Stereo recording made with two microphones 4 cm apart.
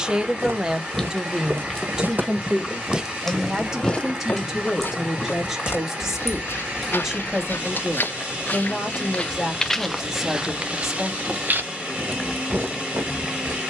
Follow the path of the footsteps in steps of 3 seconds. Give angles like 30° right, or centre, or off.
50° right, 30° left, 50° left, 10° right, 60° right.